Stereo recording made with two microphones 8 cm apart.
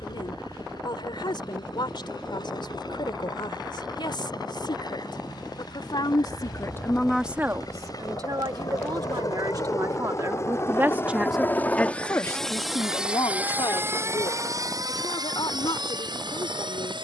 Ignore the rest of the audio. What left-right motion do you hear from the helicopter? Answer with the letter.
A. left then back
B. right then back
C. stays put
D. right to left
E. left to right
E.